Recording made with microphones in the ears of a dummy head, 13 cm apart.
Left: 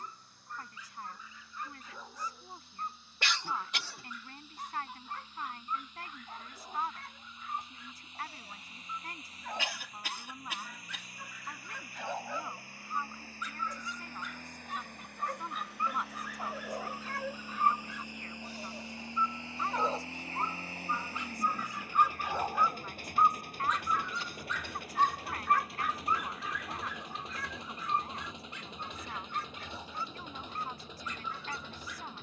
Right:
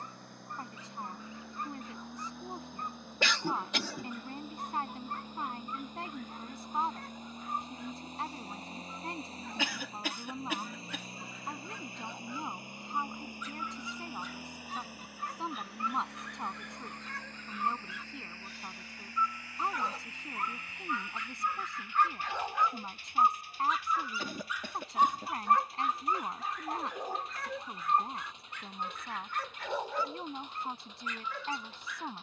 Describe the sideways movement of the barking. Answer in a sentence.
You can hear the barking move to the right.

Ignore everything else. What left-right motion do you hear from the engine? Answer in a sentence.
You can hear the engine move from right to left.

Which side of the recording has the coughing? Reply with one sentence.
You can hear the coughing on the right.